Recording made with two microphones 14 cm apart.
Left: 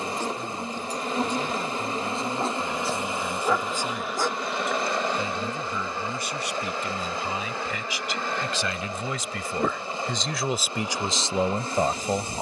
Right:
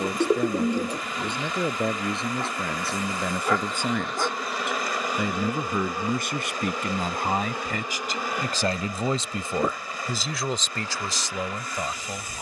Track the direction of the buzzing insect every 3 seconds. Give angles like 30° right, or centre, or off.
30° left, centre, 20° right, 20° left.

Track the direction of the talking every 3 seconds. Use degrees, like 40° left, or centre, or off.
70° right, 70° right, 50° right, centre.